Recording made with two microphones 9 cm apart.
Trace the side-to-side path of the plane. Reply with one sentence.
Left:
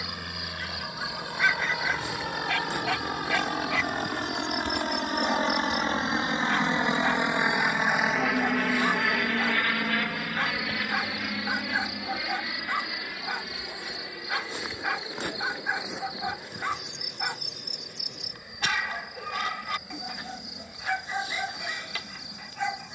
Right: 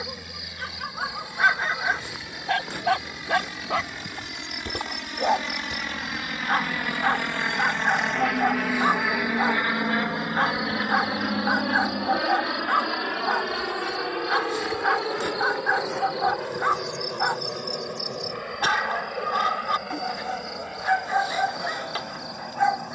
You can hear the plane go from the left side to the right.